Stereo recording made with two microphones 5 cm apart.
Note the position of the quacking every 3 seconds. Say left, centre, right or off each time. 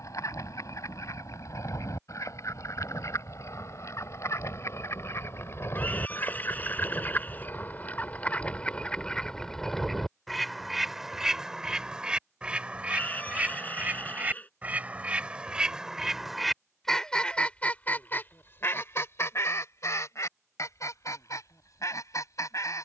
left, left, left, centre, right, centre, left, left.